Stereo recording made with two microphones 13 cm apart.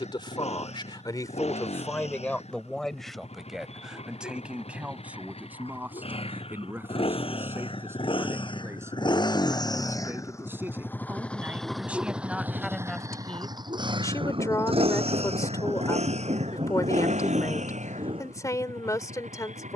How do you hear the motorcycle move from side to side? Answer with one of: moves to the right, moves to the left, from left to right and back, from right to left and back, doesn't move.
moves to the right.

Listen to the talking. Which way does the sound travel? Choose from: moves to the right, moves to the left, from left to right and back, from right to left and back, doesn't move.
from left to right and back.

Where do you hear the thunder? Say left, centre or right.
right.